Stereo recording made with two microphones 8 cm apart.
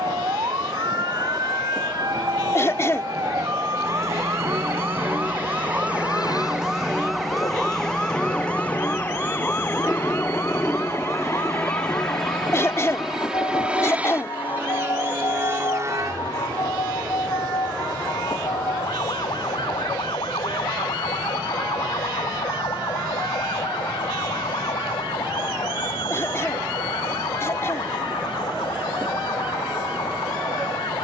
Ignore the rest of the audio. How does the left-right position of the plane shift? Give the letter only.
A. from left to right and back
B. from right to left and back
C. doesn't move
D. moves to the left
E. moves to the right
E.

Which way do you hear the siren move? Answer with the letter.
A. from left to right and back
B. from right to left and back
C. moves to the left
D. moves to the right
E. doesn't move
C.